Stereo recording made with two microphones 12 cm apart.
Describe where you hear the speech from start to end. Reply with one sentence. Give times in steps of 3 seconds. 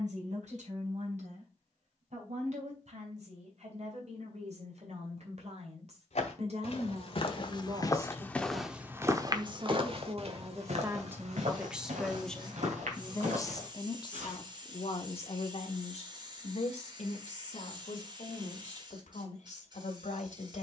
You can hear the speech on the right from 0 s and on the left from 12 s.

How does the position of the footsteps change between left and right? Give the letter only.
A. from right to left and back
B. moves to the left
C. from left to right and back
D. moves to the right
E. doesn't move
D.